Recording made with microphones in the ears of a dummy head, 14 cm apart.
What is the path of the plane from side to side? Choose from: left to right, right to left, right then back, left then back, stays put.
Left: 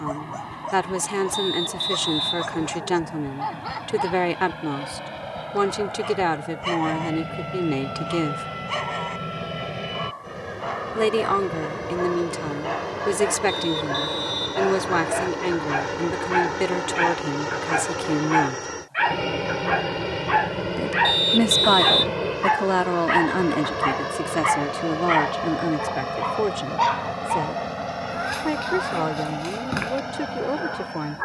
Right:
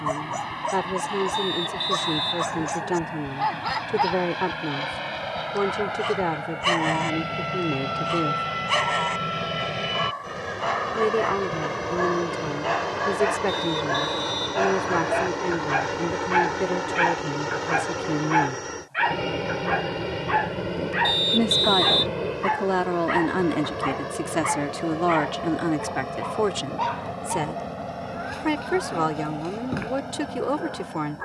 right to left.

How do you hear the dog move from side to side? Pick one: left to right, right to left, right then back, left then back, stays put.
right to left.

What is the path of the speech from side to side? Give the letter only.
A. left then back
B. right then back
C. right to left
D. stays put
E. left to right
E.